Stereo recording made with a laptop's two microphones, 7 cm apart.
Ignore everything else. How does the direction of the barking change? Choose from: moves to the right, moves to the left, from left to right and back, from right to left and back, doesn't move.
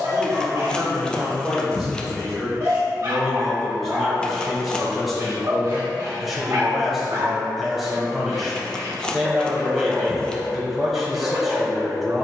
doesn't move.